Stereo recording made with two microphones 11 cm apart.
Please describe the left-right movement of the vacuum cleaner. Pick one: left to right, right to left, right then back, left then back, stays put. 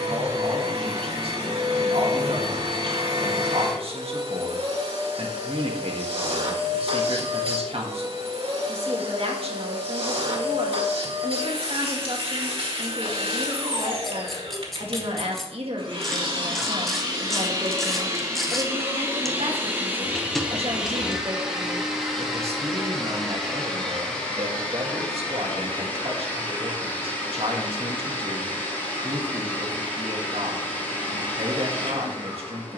right to left.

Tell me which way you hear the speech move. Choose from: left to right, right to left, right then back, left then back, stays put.
stays put.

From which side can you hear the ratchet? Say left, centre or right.
centre.